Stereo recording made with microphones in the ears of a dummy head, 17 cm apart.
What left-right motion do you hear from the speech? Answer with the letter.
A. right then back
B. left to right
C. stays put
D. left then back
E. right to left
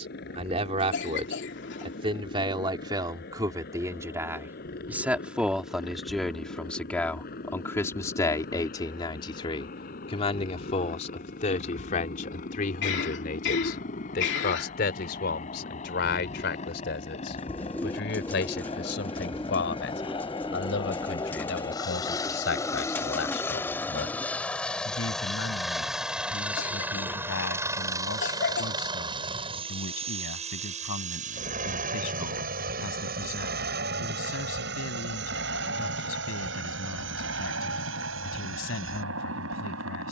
E.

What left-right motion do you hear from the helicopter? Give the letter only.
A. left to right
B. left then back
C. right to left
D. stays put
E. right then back
A.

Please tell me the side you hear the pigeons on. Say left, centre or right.
centre.